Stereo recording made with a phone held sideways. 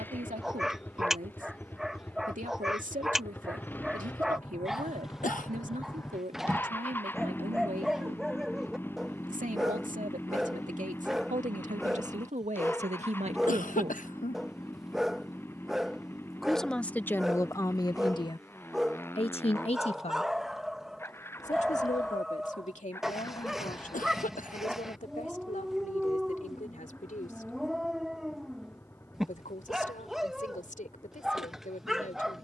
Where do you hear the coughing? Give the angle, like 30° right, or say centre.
80° left.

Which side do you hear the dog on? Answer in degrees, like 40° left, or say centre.
centre.